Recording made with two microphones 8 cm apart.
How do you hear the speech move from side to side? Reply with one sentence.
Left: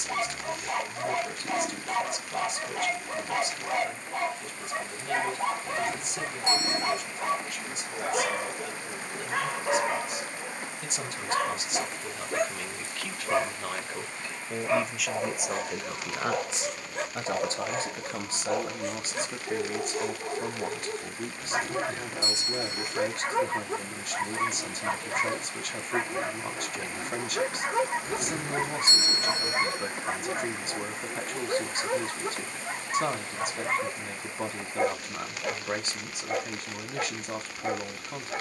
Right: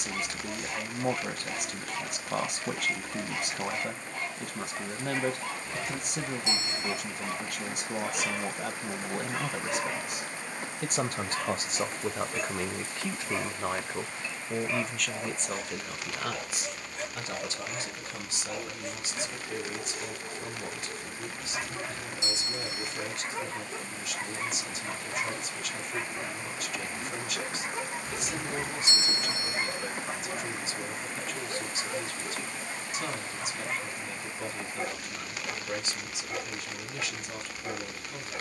You can hear the speech move to the left.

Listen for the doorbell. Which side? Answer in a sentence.
In this clip you hear the doorbell on the left.